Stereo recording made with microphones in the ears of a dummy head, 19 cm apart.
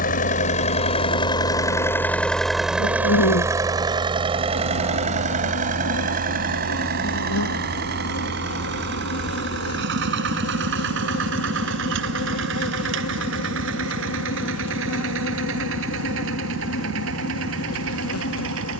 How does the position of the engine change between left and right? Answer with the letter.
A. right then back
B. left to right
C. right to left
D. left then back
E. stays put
B.